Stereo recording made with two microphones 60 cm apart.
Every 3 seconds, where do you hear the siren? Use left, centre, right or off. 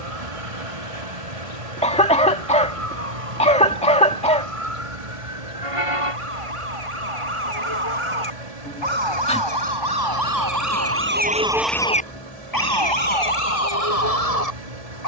right, right, right, right, left.